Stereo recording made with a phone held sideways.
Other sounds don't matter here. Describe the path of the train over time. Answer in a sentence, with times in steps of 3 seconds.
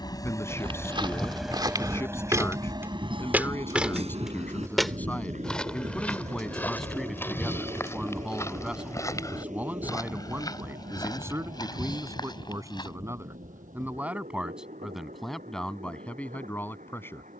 You can hear the train in the centre from 0 s and on the right from 3 s.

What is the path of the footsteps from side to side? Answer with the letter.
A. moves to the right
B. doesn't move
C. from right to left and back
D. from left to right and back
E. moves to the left
E.